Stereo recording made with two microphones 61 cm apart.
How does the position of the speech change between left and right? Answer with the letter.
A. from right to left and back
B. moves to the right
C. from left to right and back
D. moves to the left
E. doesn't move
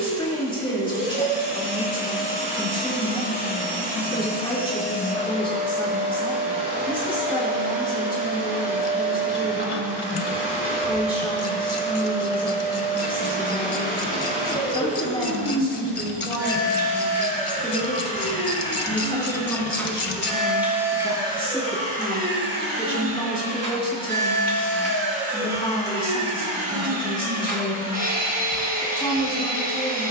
E.